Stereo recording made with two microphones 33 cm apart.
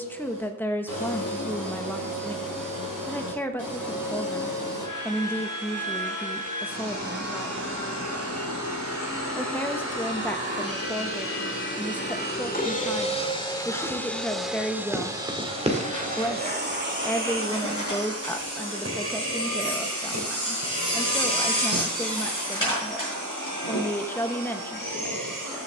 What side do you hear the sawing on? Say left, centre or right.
left.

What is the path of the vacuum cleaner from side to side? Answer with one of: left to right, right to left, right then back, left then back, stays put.
left to right.